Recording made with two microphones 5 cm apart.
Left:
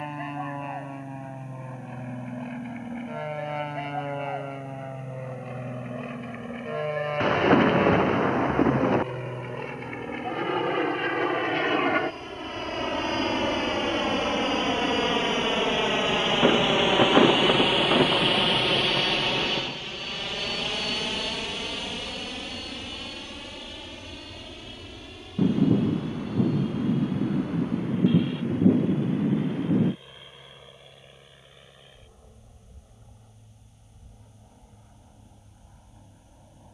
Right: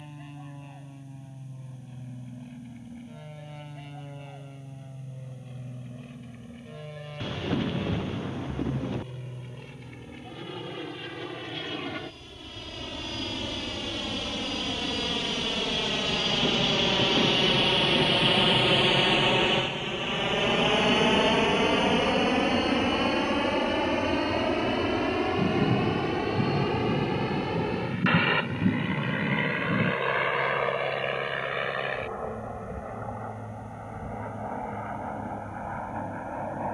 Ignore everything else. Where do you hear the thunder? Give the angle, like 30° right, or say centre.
60° left.